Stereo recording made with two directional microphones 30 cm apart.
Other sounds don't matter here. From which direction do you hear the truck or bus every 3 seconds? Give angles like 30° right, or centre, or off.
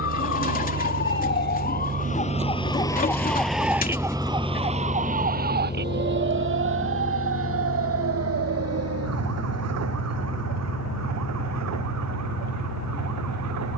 40° right, 10° left, 40° left, 60° left, 60° left.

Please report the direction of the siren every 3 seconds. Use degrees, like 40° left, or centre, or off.
30° left, 20° right, 50° right, 60° right, 70° right.